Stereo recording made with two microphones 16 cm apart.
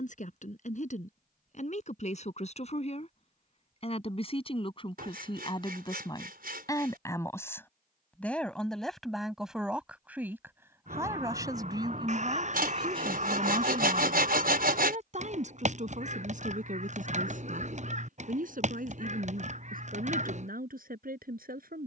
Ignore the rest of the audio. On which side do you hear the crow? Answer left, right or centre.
right.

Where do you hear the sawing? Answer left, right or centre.
right.